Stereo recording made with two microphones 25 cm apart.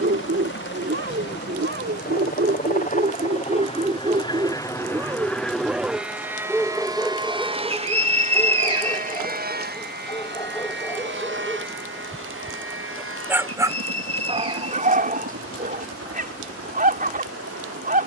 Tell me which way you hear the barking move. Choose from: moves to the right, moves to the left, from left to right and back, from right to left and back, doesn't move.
from right to left and back.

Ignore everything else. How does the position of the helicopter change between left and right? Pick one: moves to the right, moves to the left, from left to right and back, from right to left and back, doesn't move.
moves to the right.